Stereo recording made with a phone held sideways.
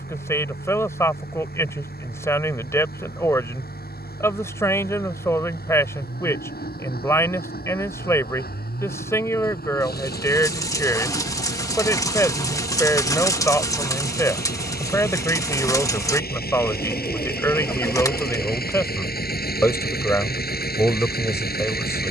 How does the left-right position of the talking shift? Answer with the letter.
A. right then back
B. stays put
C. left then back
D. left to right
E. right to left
B.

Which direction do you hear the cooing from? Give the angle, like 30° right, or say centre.
20° left.